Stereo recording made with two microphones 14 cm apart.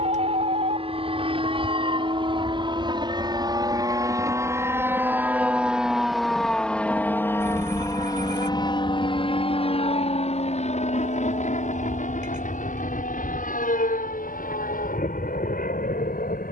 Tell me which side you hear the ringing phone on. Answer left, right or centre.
right.